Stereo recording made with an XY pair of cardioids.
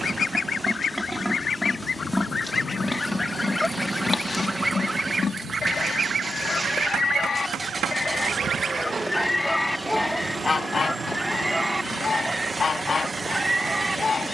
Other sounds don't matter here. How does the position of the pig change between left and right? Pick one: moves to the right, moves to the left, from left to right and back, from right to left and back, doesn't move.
from right to left and back.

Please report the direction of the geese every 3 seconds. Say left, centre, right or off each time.
left, centre, right, centre, left.